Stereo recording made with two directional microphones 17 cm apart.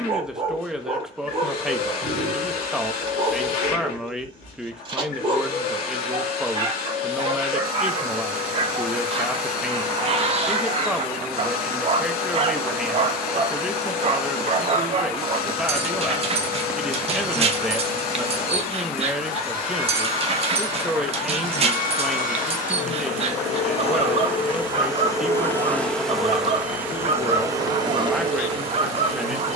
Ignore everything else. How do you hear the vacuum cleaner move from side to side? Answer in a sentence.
In this clip you hear the vacuum cleaner move from left to right.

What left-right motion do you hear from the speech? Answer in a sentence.
You can hear the speech stay in one place.